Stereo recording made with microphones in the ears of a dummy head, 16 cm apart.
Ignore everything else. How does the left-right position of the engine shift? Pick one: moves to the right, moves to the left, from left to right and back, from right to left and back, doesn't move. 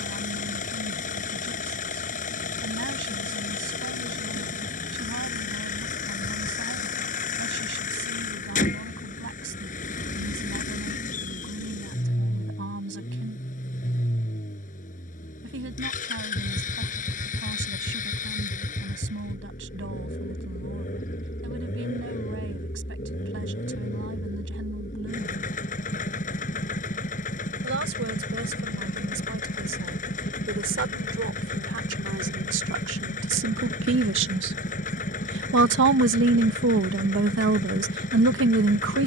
doesn't move.